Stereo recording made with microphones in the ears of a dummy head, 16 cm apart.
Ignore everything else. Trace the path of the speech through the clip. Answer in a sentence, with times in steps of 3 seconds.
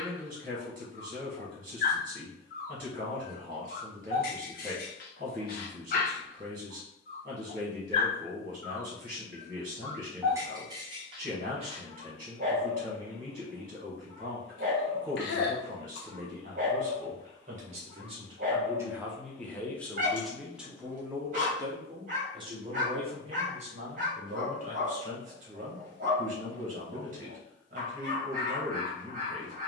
You can hear the speech on the right from 0 s, in the centre from 18 s and on the right from 21 s.